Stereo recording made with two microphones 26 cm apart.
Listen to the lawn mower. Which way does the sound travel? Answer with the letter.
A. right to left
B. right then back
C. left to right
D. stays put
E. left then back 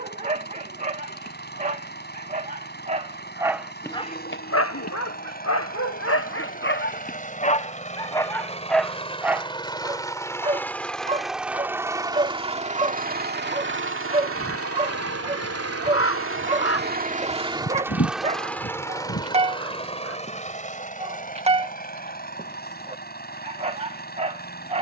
B.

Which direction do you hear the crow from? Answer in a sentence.
In this clip you hear the crow on the left.